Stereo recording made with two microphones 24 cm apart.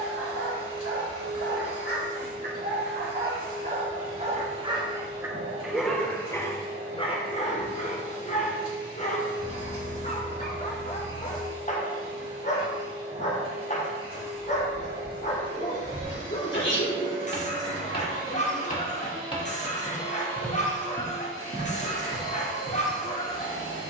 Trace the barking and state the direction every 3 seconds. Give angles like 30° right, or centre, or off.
60° right, 30° right, 30° left, 30° left, 30° left, 30° left, 30° left, 30° left.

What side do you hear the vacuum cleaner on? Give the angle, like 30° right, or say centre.
80° right.